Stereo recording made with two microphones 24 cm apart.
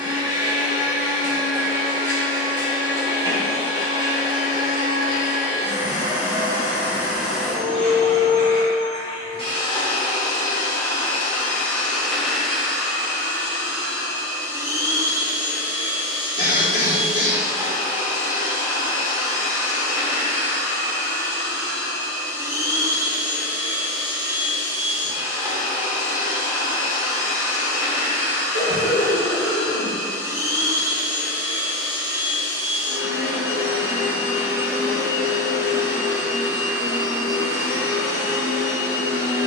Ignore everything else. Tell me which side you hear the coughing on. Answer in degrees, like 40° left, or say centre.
70° left.